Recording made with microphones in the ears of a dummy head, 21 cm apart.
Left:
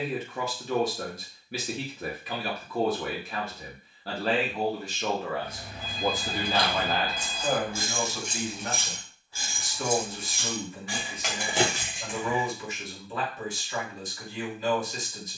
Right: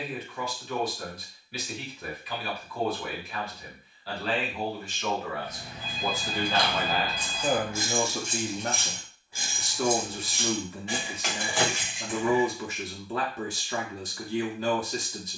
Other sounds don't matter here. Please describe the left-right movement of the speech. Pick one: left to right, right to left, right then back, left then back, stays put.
left to right.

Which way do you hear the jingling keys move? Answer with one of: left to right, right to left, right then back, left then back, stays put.
right then back.